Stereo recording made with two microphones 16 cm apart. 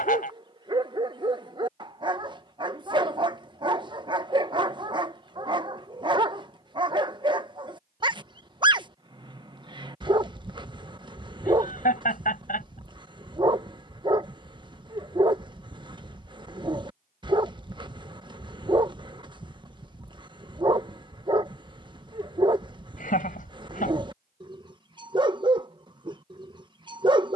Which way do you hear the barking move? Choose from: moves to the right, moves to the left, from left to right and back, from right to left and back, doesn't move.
doesn't move.